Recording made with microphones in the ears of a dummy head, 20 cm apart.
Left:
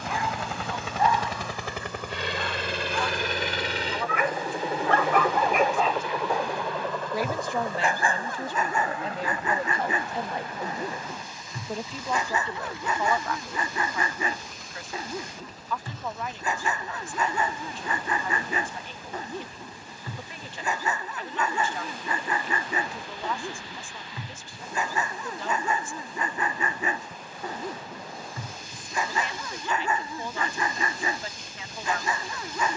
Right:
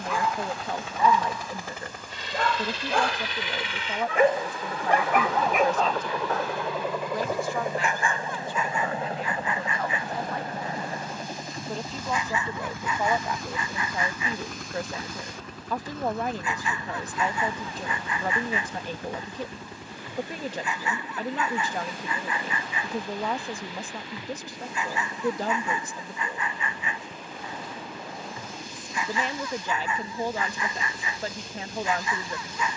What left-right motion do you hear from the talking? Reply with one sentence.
You can hear the talking move from right to left and back again.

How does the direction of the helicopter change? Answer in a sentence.
You can hear the helicopter move to the right.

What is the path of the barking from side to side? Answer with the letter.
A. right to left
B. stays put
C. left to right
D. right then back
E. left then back
A.